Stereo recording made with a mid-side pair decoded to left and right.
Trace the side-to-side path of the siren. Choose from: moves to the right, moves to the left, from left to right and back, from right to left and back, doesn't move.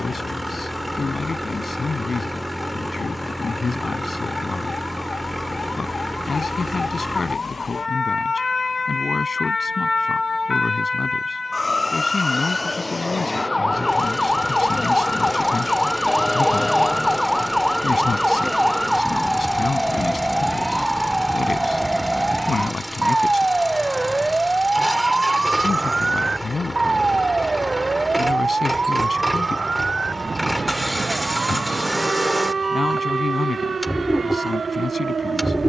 moves to the right.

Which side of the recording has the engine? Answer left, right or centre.
centre.